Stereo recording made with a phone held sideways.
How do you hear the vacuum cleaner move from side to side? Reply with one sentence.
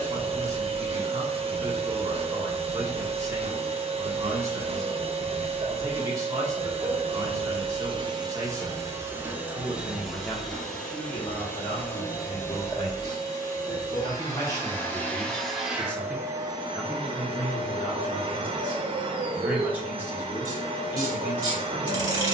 In this clip you hear the vacuum cleaner move from right to left and back again.